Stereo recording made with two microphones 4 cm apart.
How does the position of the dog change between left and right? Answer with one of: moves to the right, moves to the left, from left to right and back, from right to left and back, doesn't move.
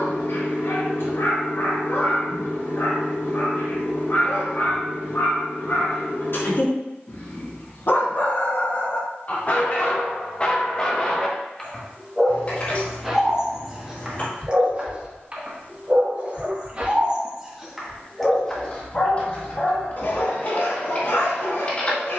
from left to right and back.